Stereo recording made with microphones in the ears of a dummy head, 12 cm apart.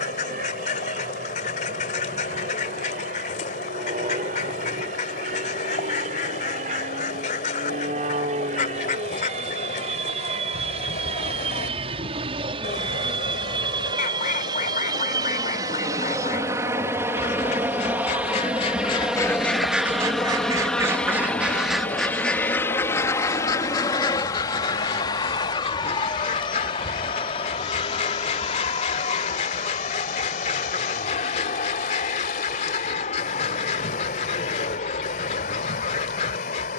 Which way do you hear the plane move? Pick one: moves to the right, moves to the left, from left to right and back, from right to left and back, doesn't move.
moves to the left.